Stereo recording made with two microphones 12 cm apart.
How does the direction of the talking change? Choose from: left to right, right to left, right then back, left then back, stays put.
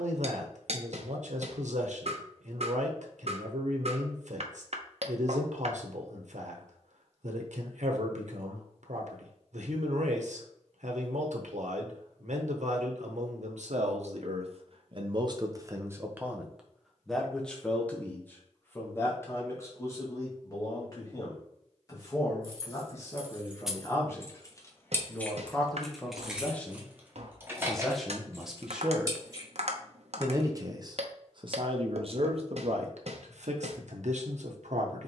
left then back.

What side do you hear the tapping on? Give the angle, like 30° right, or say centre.
60° right.